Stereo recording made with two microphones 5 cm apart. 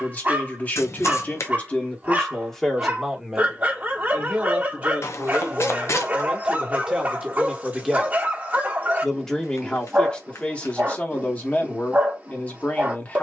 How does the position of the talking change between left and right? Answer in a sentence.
You can hear the talking go right and come back.